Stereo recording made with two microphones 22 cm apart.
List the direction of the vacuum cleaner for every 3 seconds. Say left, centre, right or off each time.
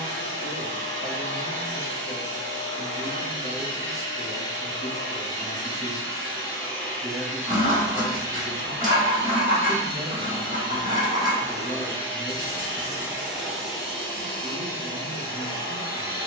left, left, centre, right, centre, left.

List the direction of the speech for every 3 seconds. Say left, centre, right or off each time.
left, left, centre, centre, left, left.